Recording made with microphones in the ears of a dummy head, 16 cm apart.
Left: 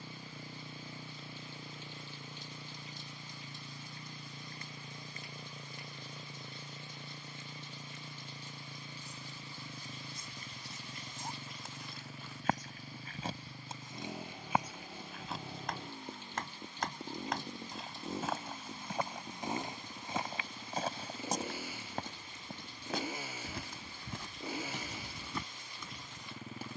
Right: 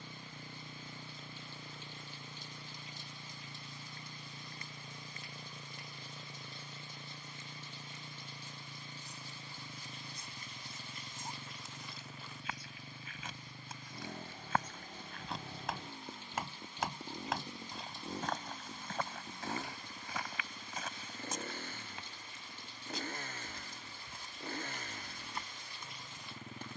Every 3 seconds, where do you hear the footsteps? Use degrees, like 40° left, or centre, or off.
off, off, off, 60° left, 30° left, centre, 20° left, 40° left, 60° left.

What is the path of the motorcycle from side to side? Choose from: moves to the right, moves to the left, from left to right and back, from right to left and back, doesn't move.
doesn't move.